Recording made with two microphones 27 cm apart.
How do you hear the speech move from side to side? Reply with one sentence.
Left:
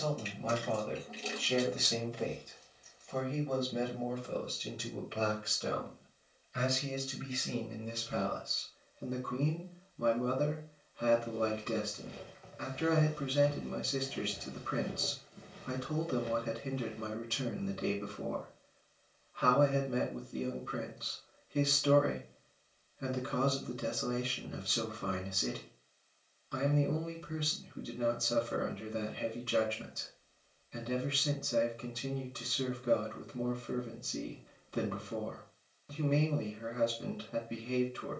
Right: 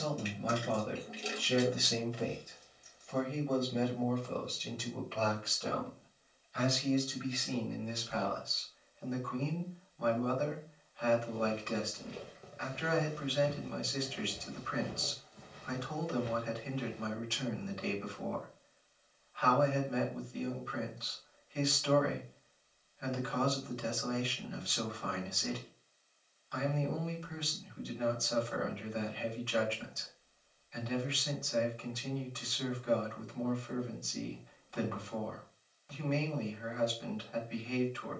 You can hear the speech move from right to left.